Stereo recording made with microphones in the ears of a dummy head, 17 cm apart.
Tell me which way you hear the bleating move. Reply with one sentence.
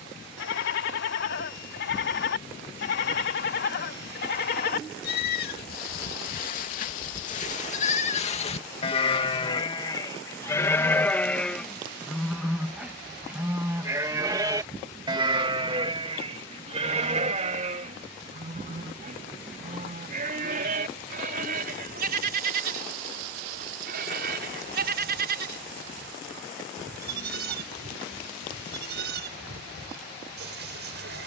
In this clip you hear the bleating move from left to right.